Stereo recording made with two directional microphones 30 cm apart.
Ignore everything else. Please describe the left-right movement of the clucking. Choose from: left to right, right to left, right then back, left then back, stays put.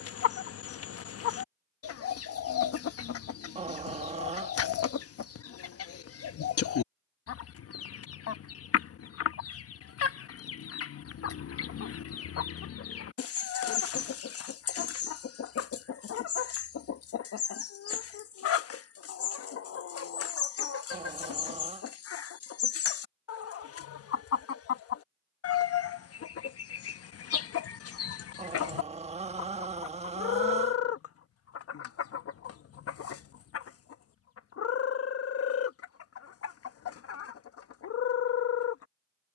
stays put.